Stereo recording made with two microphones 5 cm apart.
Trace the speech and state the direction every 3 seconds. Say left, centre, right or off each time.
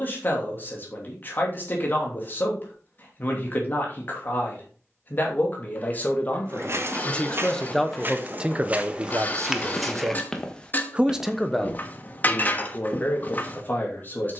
left, left, centre, right, left.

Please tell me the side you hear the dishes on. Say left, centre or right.
left.